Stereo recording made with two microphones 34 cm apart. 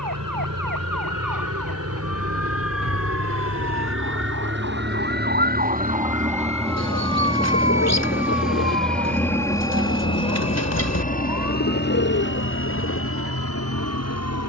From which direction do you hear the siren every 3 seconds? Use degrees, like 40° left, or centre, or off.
70° right, 40° right, 20° left, 50° left, 70° left.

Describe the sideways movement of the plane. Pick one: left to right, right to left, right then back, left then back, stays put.
right to left.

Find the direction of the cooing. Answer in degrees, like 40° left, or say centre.
50° left.